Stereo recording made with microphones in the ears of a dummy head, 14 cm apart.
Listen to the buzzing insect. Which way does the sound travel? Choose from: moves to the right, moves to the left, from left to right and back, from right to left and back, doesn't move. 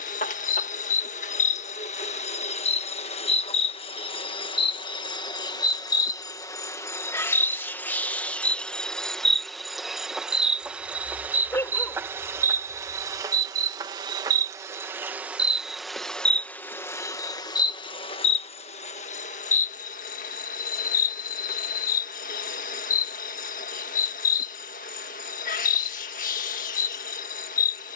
from left to right and back.